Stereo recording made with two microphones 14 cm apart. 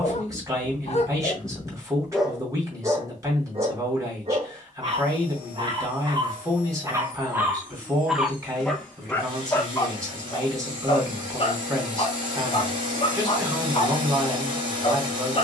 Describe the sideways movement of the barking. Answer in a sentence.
In this clip you hear the barking go right and come back.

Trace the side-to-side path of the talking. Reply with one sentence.
You can hear the talking stay put.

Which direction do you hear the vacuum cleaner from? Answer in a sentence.
You can hear the vacuum cleaner on the right.